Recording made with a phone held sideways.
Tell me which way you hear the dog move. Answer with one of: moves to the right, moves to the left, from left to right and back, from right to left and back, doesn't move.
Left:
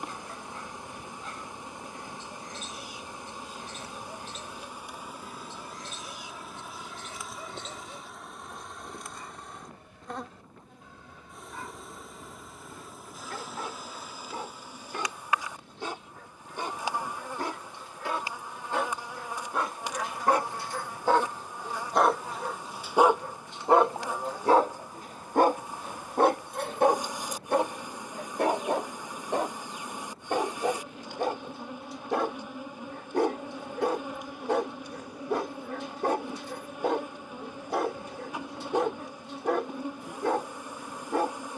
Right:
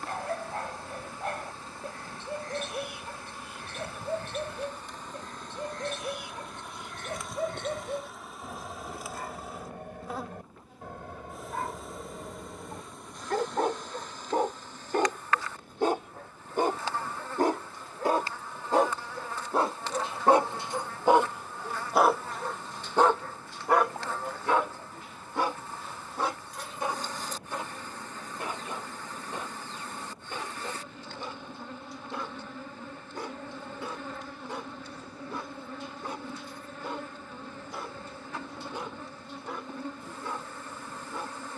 moves to the left.